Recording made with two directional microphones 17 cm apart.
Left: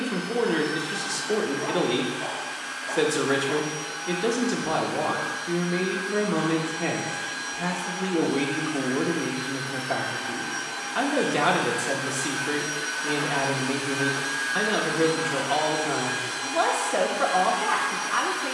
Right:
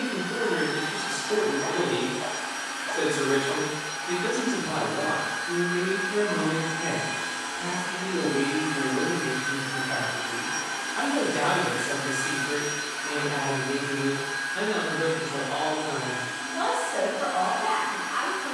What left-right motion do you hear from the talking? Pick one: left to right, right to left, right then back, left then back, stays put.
stays put.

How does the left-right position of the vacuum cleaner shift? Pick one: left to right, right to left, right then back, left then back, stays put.
right to left.